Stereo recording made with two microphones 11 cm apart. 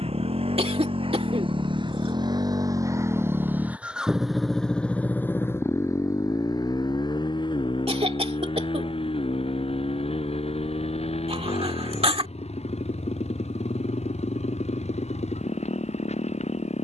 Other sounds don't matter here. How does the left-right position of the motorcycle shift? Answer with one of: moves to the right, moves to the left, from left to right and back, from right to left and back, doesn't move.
moves to the left.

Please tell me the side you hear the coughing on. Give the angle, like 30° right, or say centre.
60° right.